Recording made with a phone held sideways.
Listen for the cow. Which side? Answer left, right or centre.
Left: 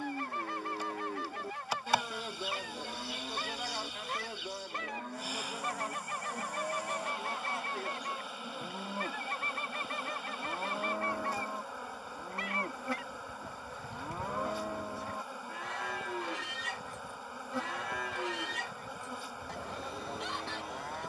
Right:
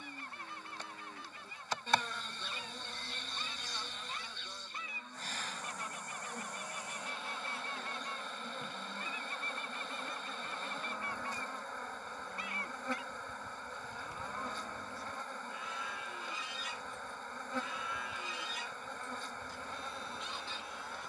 left.